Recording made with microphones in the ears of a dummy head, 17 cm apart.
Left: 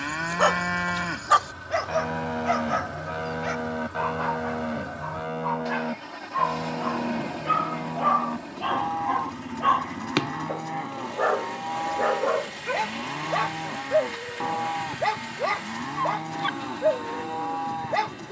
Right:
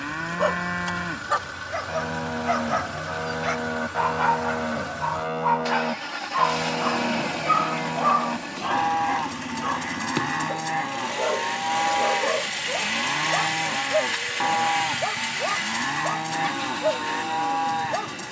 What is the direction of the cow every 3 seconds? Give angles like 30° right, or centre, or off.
10° left, 20° right, 50° right, 60° right, 60° right, 60° right.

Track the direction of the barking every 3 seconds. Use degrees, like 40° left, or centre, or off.
20° left, 30° right, 10° right, 30° left, 60° left, 60° left.